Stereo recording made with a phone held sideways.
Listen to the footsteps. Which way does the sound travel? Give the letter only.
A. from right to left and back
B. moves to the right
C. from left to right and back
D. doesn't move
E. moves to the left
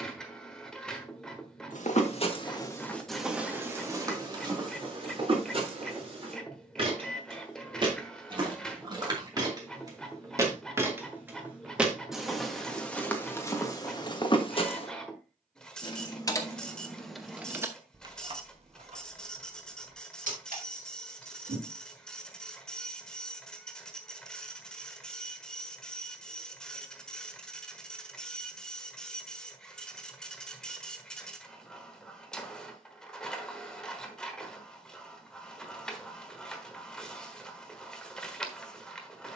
C.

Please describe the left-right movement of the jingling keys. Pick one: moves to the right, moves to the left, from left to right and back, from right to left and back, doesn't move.
moves to the right.